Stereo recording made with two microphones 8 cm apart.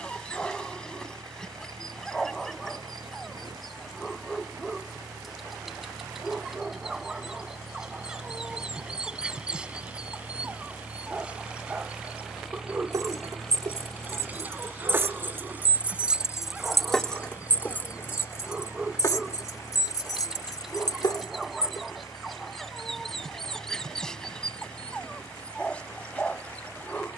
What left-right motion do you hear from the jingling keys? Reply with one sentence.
In this clip you hear the jingling keys move from right to left.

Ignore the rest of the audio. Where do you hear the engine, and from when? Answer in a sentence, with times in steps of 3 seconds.
You can hear the engine on the right from 0 s, in the centre from 12 s and on the left from 15 s.